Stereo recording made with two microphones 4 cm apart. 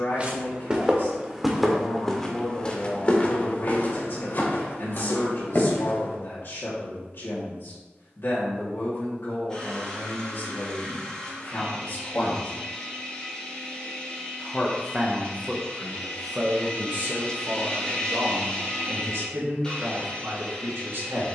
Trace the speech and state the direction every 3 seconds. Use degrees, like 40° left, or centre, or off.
60° left, 60° left, 60° left, 60° left, 30° left, 30° right, 70° right.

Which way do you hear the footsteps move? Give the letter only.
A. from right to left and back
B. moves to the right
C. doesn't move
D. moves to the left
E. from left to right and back
D.